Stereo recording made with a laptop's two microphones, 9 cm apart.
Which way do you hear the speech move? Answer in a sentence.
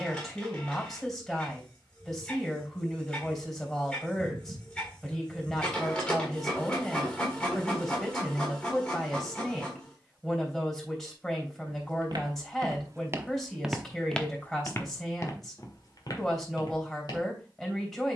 You can hear the speech stay put.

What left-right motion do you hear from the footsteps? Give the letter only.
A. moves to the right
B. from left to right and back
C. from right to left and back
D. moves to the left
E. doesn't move
D.